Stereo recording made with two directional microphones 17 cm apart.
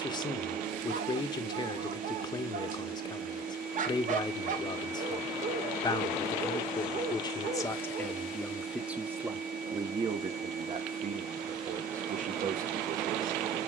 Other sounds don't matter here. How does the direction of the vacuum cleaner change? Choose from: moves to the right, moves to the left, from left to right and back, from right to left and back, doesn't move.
doesn't move.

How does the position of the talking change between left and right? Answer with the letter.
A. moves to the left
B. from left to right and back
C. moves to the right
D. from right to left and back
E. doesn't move
C.